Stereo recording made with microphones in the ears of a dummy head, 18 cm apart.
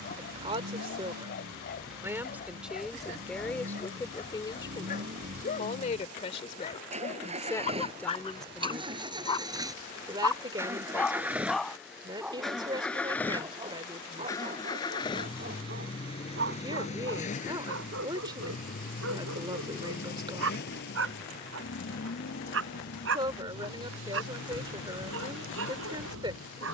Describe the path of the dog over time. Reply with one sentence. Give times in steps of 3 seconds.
In this clip you hear the dog on the left from 0 s, in the centre from 9 s and on the right from 12 s.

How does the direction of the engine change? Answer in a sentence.
You can hear the engine go from the right side to the left.